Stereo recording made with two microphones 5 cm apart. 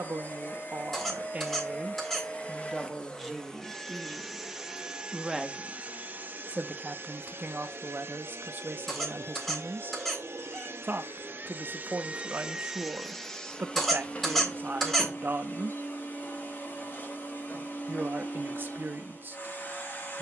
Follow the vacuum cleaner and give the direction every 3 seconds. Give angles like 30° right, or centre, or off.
40° left, 10° right, 50° right, 60° right, 10° left, 40° left, 40° left.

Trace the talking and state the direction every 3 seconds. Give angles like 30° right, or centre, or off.
30° right, centre, 40° right, 40° right, 40° right, 40° right, 40° right.